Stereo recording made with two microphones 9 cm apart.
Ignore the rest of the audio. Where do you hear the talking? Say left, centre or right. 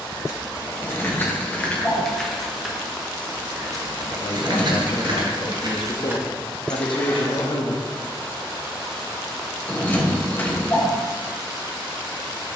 left.